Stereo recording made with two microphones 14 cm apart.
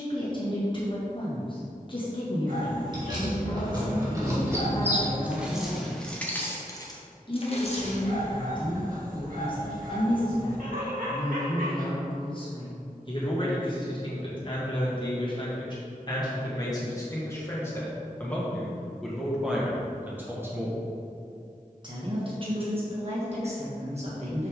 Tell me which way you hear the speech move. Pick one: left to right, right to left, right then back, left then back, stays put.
left to right.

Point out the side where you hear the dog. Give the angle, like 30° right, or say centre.
70° right.